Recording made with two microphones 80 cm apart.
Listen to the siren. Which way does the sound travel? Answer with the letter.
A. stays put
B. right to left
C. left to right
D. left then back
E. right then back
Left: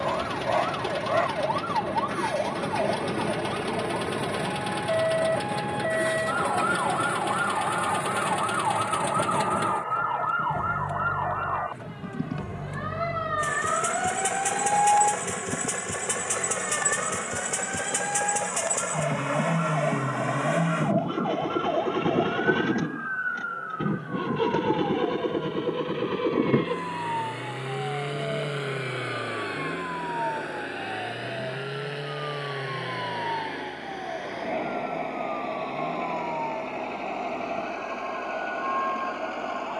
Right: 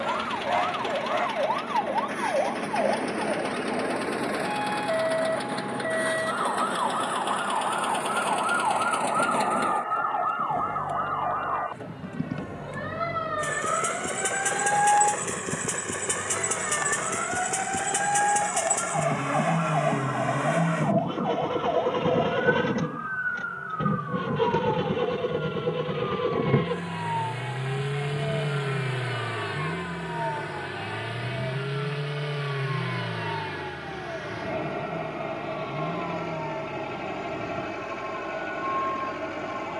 C.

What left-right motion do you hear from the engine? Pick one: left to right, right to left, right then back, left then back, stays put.
left to right.